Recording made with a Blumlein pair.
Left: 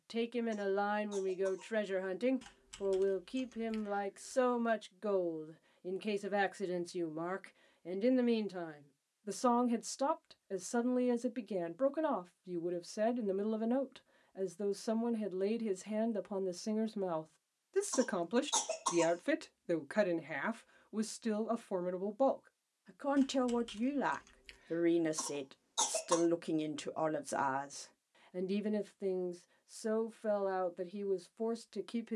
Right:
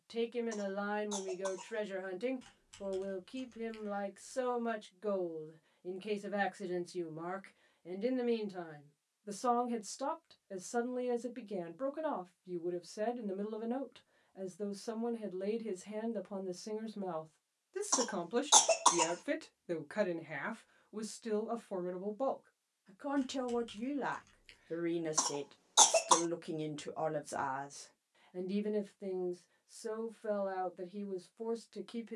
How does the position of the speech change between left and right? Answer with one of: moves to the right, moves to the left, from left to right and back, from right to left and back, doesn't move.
doesn't move.